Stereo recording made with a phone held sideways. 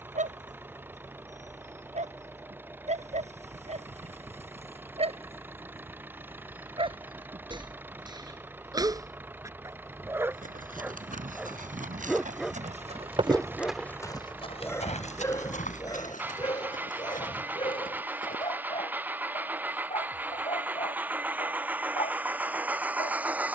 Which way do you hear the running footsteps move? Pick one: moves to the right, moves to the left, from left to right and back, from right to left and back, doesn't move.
moves to the left.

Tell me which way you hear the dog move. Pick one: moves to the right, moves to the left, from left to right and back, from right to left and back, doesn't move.
moves to the left.